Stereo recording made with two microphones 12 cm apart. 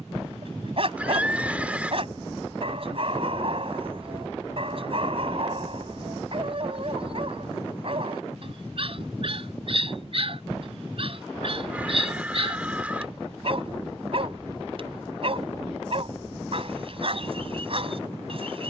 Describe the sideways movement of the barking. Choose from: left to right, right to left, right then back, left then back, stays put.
stays put.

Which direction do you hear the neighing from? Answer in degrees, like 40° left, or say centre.
10° right.